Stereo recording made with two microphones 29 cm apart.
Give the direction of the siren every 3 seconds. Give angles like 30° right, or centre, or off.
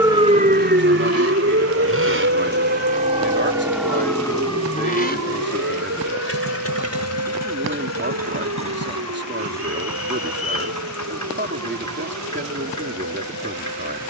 40° right, 60° right, 60° right, 60° right, 60° right.